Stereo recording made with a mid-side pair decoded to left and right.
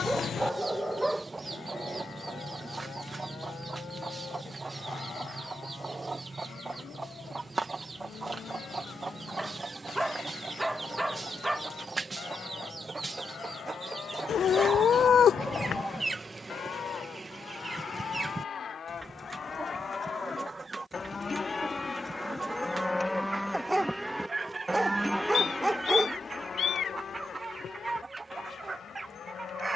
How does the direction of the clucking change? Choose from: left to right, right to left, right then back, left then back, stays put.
stays put.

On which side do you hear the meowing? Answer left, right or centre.
left.